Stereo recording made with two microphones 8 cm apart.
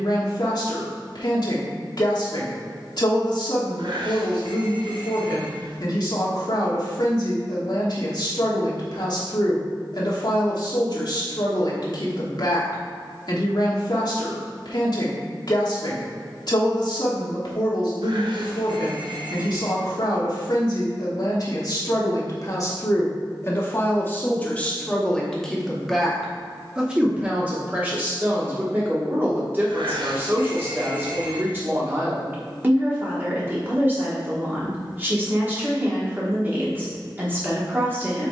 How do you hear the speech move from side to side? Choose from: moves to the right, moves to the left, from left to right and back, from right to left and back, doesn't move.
moves to the right.